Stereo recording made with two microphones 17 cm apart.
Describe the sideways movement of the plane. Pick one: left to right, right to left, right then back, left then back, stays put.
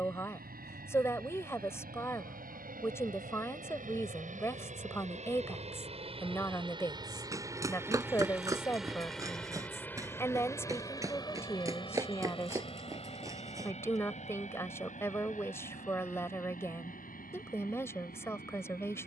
right to left.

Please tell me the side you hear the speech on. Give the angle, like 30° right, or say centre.
20° left.